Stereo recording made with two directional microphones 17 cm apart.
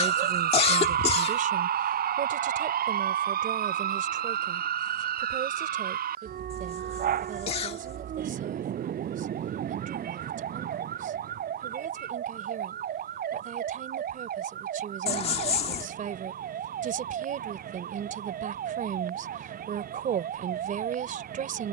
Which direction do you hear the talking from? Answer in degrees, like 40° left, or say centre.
50° right.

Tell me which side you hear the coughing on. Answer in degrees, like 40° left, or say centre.
40° left.